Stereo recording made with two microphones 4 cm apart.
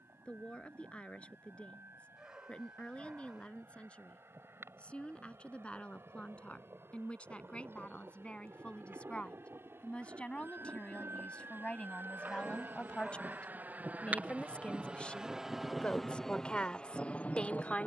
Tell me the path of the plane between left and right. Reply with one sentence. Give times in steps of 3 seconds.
You can hear the plane on the right from 0 s and in the centre from 15 s.